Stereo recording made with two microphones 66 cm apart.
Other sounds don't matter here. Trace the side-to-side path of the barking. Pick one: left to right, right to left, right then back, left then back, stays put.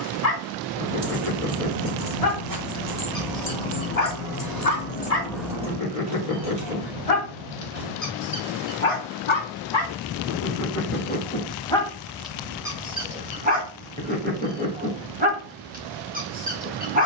left to right.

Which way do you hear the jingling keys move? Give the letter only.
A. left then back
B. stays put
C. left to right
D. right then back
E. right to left
A.